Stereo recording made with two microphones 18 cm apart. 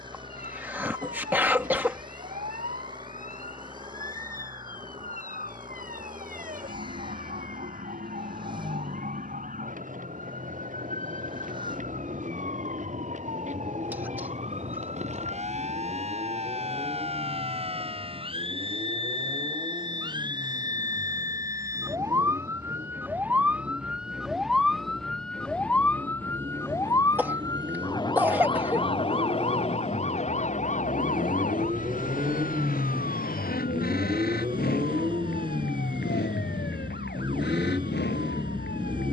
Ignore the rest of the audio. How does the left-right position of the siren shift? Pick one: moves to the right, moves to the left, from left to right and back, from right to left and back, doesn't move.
moves to the left.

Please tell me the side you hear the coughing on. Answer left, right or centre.
centre.